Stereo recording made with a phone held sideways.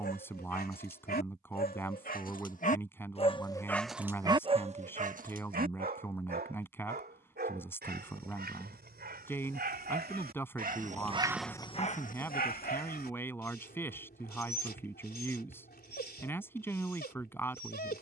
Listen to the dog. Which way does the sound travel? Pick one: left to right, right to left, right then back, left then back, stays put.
right then back.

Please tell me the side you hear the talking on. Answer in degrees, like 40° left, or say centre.
10° left.